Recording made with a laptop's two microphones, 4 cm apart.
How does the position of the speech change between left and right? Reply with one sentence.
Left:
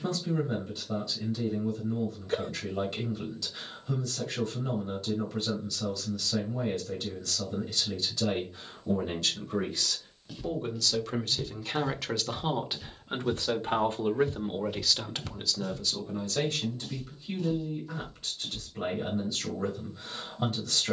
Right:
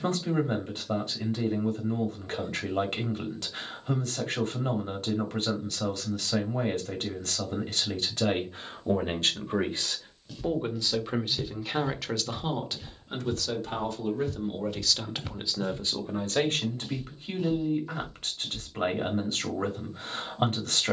In this clip you hear the speech move from right to left and back again.